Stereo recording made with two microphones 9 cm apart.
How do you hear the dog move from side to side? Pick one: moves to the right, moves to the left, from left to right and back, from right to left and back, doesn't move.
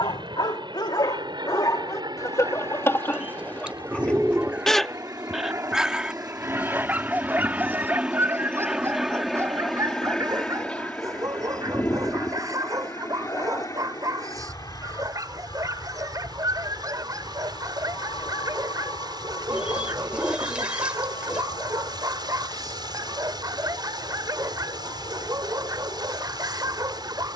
moves to the right.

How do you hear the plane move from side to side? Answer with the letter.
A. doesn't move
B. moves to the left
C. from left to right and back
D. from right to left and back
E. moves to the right
B.